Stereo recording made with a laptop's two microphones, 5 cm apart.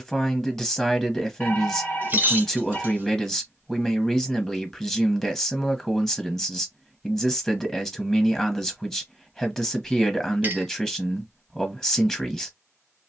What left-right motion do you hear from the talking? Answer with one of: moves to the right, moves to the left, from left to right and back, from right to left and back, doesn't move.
doesn't move.